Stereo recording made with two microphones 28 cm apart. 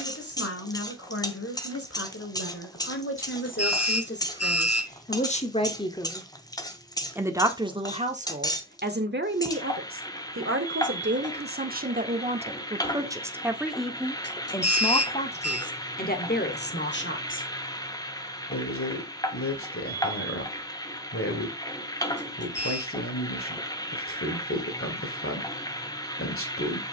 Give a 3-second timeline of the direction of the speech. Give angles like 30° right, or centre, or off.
50° left, 30° left, 20° right, 40° right, 10° right, 30° left, 50° left, 50° left, 50° left.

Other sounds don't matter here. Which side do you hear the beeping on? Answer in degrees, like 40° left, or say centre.
60° left.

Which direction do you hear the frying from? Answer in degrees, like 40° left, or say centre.
10° left.